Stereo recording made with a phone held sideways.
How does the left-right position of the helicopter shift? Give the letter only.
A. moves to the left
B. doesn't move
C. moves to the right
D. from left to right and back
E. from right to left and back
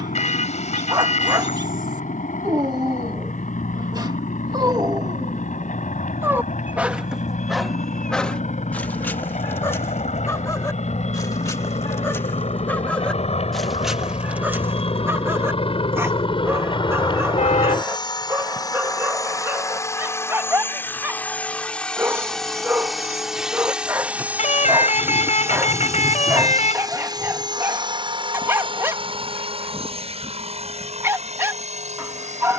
C.